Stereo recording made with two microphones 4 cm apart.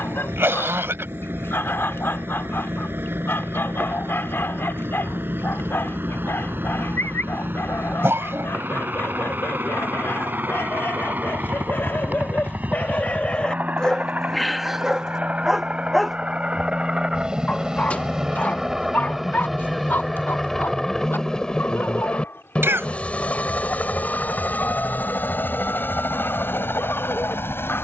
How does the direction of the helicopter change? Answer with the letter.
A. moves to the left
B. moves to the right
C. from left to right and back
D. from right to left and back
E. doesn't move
A.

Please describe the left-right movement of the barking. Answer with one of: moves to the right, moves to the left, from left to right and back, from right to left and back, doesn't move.
from left to right and back.